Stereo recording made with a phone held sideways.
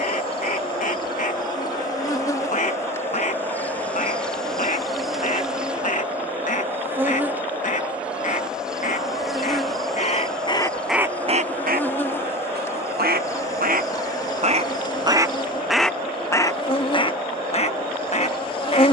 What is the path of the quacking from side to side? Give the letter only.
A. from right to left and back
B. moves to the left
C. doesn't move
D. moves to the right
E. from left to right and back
E.